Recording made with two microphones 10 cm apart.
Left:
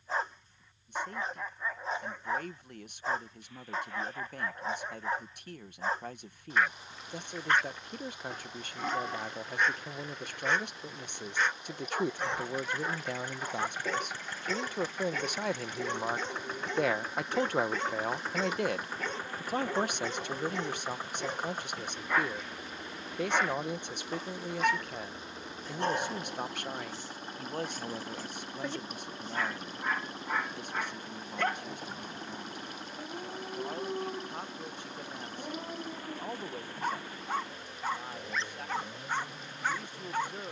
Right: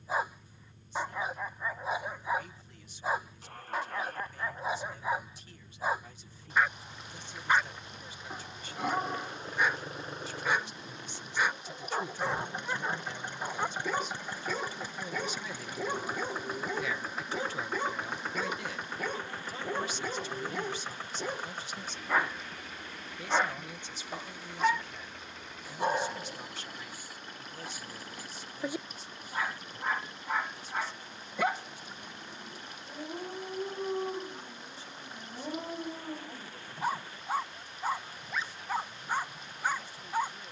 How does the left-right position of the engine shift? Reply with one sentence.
In this clip you hear the engine move to the left.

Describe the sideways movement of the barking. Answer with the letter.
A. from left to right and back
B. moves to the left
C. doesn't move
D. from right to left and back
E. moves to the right
C.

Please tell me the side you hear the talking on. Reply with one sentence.
In this clip you hear the talking on the left.